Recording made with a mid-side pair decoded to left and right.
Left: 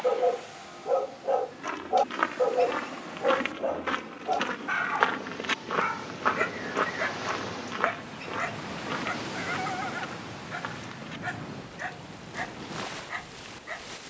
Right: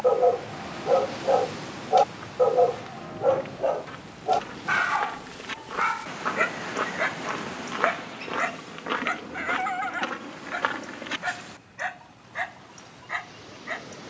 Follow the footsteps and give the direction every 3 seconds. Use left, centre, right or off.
left, left, centre, right, off.